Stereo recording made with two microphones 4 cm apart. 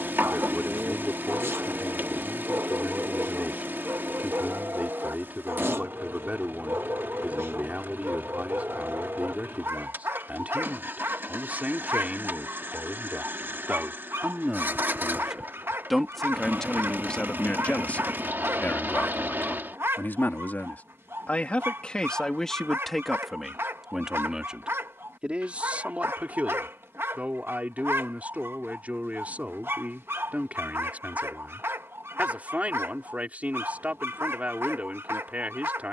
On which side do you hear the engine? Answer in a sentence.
You can hear the engine on the right.